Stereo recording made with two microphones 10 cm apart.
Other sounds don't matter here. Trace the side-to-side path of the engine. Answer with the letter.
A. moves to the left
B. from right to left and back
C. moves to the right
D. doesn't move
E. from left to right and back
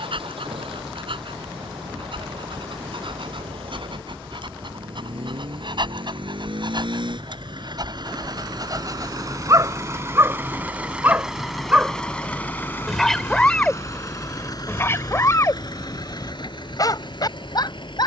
A.